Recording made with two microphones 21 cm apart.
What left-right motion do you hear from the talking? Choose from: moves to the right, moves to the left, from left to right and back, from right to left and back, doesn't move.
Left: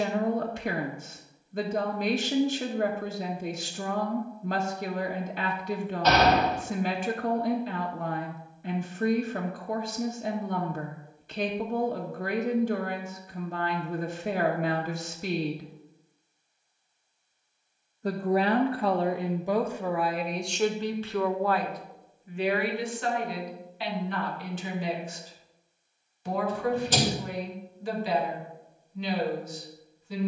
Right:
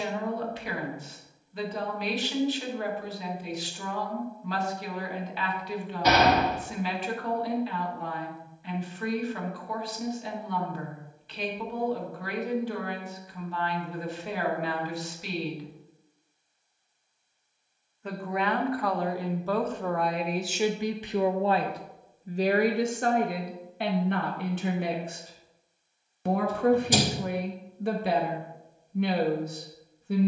moves to the right.